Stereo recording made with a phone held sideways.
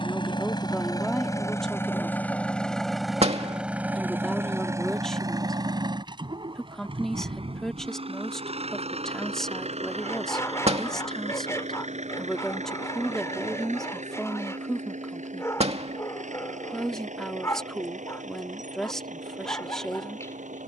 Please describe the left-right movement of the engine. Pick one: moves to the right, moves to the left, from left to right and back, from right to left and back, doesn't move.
moves to the right.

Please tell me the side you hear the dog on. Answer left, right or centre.
left.